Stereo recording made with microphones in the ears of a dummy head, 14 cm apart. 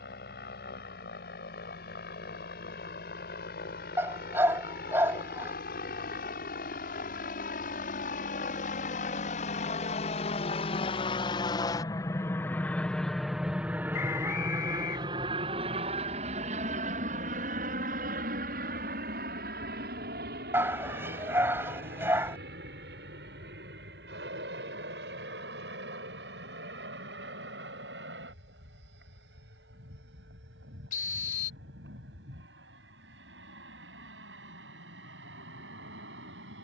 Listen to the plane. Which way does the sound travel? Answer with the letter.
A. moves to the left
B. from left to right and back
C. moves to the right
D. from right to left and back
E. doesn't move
C.